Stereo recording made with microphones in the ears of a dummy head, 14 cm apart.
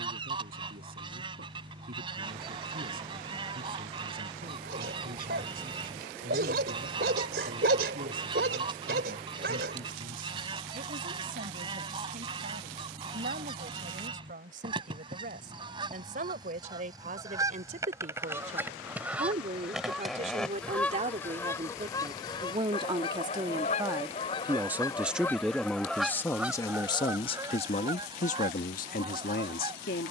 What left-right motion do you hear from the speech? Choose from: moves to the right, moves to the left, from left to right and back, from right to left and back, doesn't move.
moves to the left.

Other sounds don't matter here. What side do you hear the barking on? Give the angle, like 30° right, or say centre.
70° right.